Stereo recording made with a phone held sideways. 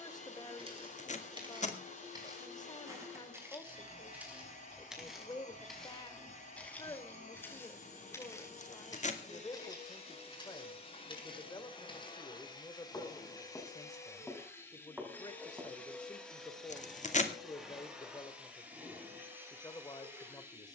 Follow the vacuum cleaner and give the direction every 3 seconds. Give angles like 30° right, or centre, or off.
50° left, 50° left, 50° left, 40° left, 20° left, centre, 10° right.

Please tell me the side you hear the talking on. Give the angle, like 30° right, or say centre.
20° left.